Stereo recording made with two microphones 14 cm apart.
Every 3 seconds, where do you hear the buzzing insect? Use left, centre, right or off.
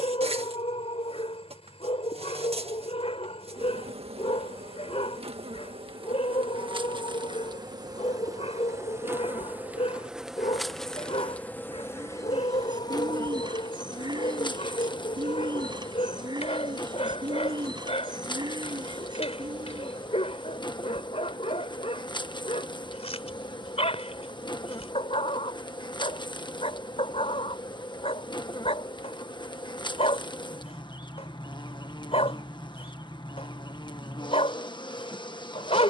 right, right, right, centre, left, left, left, left, left, left, left, left.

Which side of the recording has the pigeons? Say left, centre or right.
right.